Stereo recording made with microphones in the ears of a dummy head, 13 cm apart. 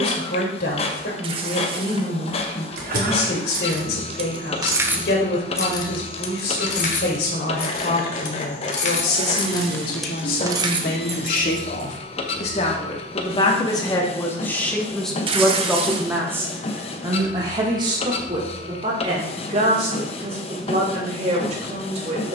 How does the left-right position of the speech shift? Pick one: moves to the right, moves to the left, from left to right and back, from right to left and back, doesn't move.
moves to the right.